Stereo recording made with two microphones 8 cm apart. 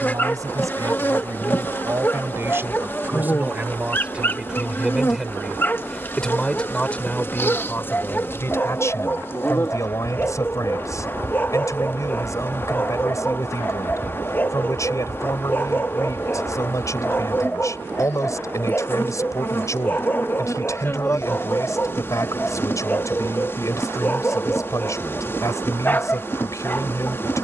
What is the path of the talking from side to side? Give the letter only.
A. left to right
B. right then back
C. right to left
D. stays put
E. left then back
C.